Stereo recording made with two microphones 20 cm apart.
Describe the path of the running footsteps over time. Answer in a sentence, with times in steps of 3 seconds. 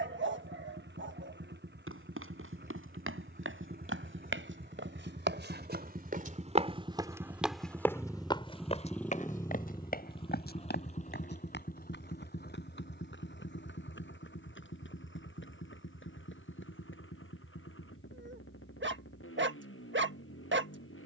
You can hear the running footsteps on the right from 0 s, in the centre from 6 s, on the left from 9 s and not at all from 18 s.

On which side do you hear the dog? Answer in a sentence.
In this clip you hear the dog on the right.